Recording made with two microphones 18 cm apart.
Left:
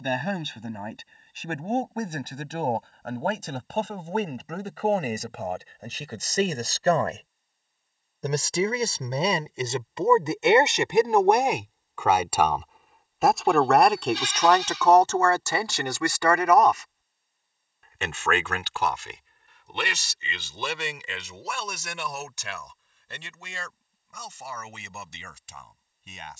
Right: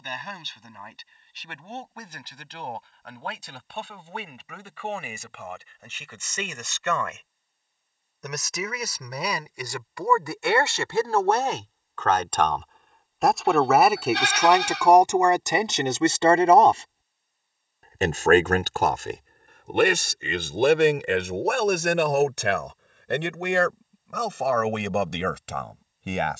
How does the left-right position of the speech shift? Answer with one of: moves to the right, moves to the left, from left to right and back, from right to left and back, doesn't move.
moves to the right.